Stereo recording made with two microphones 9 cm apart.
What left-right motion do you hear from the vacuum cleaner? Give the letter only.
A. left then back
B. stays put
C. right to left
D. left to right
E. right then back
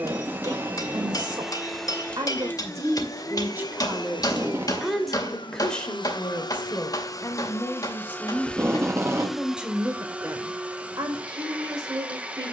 A.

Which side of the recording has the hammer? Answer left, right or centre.
left.